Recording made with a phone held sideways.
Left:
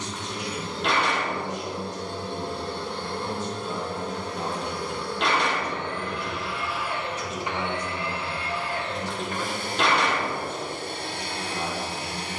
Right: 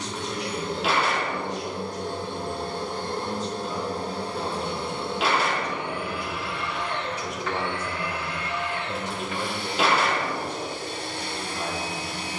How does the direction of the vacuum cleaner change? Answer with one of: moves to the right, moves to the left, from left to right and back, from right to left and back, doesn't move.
moves to the left.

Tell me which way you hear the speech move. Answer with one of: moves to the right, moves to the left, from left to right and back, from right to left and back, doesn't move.
from left to right and back.